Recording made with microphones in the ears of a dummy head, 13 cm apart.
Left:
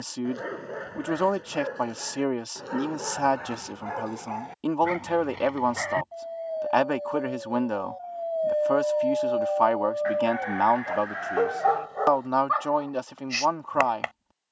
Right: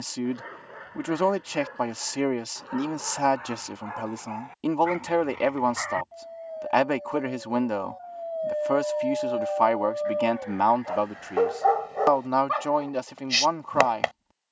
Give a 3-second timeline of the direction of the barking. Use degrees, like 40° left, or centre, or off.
50° left, 40° left, 30° left, centre, 30° right.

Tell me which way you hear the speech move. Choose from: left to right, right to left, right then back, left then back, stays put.
stays put.